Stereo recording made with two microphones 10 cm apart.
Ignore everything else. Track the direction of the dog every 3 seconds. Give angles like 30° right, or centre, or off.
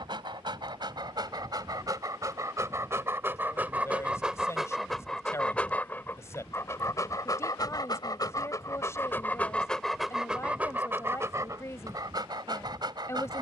40° right, centre, 30° left, 10° right, 40° right.